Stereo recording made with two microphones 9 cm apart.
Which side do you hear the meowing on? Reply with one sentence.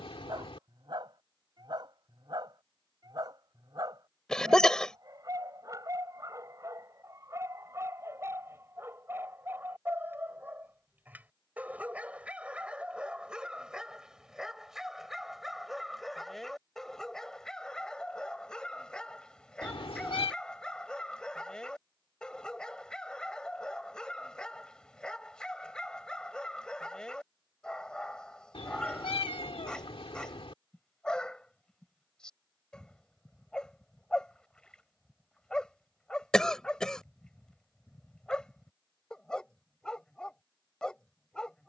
In this clip you hear the meowing on the left.